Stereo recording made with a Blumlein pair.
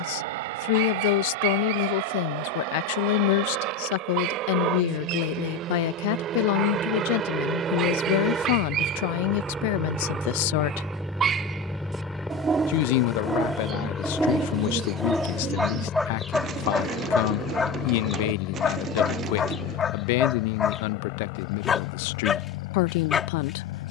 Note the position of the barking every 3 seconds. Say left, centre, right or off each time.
right, right, right, right, centre, centre, left, left.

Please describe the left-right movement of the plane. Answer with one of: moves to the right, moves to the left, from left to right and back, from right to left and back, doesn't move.
moves to the left.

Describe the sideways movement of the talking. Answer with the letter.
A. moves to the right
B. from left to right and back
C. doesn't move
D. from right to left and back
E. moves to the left
C.